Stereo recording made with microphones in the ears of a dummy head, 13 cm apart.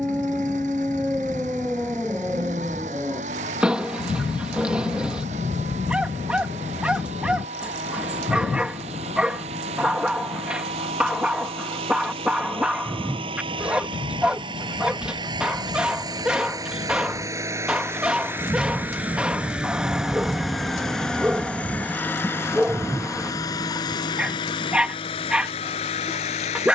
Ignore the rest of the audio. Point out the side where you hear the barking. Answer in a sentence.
In this clip you hear the barking in the centre.